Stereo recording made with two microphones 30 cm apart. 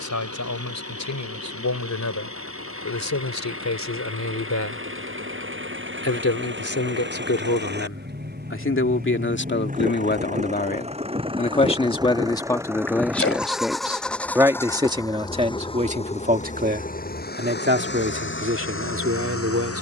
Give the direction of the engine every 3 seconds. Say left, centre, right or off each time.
right, right, right, right, centre, left, left.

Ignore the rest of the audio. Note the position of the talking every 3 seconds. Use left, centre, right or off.
left, left, left, left, centre, right, right.